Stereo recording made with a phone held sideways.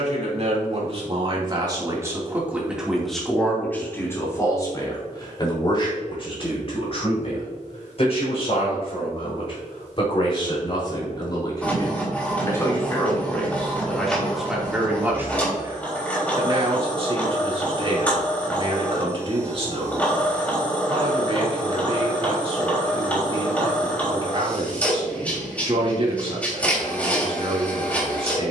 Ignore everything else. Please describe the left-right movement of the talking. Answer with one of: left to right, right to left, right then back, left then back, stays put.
left then back.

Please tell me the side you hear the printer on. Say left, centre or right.
centre.